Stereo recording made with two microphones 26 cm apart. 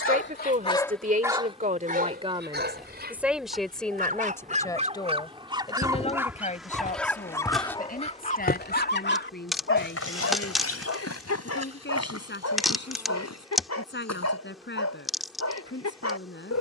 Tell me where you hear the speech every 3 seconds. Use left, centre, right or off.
right, centre, left, left, left, left.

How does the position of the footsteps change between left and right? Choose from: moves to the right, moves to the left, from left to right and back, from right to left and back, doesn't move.
moves to the left.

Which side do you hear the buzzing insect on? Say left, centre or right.
centre.